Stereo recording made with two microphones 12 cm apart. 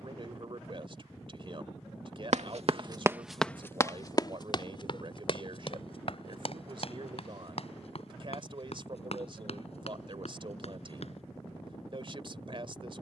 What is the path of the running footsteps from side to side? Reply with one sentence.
In this clip you hear the running footsteps go from the right side to the left.